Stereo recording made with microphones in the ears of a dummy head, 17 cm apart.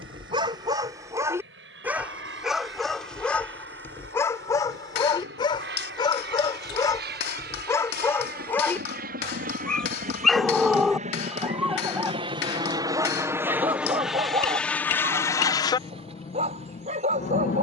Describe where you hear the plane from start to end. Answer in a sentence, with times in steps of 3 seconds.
You can hear the plane on the right from 0 s, in the centre from 12 s and on the left from 15 s.